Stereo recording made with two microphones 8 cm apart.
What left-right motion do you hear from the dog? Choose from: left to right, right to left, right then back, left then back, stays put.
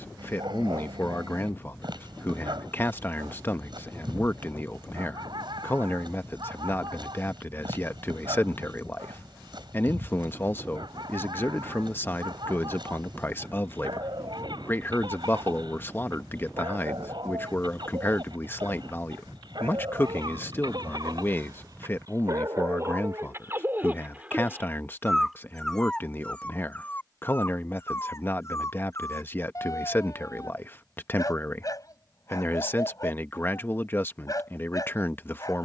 right to left.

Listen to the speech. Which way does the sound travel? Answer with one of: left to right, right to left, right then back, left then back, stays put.
stays put.